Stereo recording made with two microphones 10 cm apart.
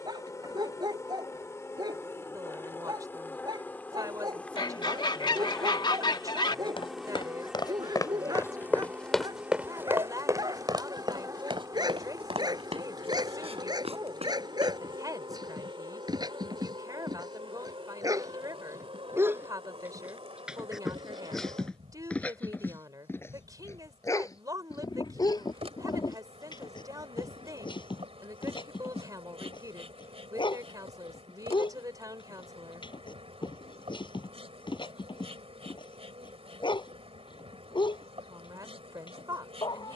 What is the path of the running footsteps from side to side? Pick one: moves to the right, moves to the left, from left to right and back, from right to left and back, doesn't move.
moves to the right.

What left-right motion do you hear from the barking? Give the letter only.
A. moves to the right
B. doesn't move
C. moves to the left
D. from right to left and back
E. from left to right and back
C.